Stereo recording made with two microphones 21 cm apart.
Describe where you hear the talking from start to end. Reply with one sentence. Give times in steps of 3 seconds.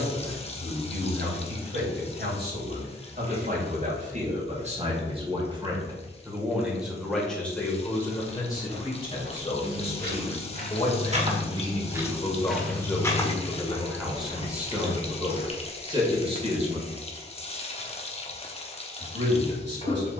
You can hear the talking on the right from 0 s, in the centre from 6 s, on the left from 9 s, in the centre from 12 s and on the right from 15 s.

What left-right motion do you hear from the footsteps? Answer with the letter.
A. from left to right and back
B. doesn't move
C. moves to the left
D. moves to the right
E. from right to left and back
C.